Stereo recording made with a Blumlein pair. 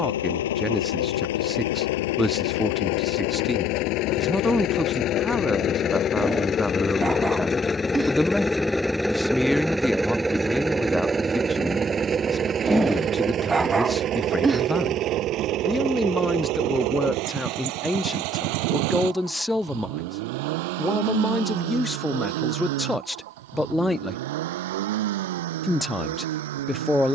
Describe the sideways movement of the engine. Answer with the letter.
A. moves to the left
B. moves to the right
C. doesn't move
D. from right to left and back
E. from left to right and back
B.